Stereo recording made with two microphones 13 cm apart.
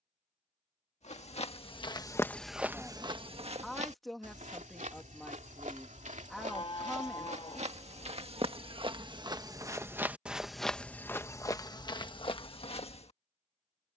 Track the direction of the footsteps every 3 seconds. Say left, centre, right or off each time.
left, right, right, centre, left.